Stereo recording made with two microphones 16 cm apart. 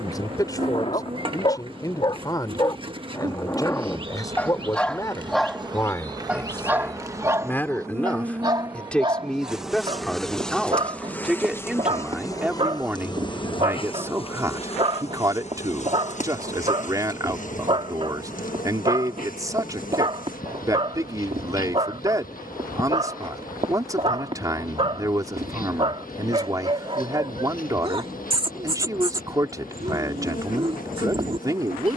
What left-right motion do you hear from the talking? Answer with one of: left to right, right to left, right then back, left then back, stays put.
left to right.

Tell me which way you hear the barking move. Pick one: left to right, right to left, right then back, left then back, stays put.
left to right.